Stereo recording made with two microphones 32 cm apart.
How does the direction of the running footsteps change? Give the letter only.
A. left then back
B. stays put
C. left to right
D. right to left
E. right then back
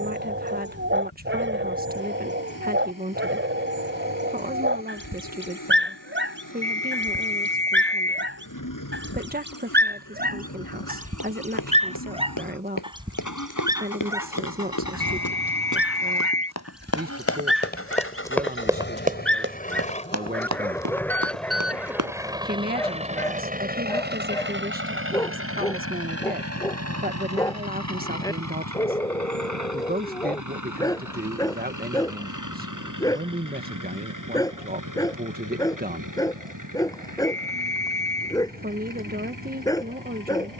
C.